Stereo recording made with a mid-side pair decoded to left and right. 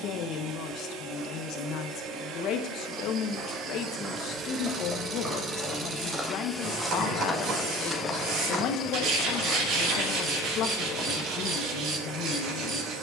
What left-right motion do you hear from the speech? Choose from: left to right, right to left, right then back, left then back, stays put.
stays put.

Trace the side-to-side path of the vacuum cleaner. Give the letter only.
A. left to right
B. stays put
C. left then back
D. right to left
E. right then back
C.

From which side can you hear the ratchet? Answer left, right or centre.
right.